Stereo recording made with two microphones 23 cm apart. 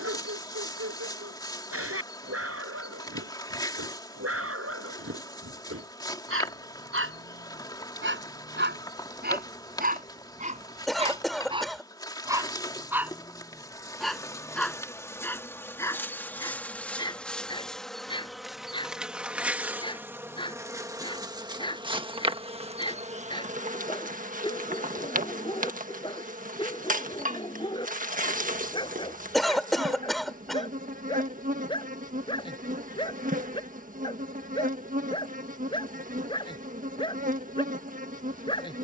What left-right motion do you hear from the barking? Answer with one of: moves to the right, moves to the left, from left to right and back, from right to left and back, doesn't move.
moves to the left.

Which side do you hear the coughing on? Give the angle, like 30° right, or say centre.
centre.